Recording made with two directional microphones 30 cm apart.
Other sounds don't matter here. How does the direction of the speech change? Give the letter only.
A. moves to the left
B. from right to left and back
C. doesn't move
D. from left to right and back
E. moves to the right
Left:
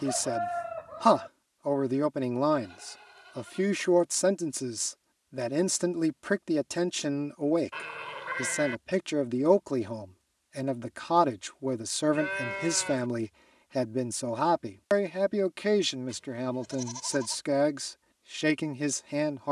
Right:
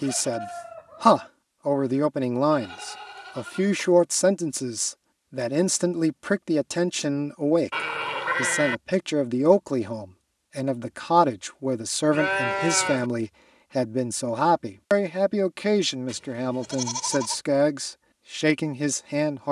C.